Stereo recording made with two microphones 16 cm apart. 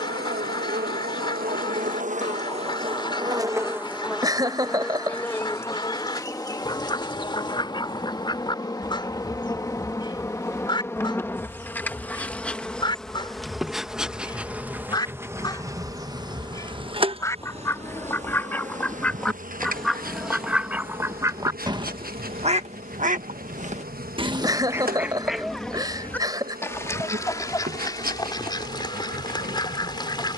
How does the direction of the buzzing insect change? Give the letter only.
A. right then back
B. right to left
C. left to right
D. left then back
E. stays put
D.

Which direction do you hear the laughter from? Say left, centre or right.
right.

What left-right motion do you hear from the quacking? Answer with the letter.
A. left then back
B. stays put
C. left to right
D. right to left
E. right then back
E.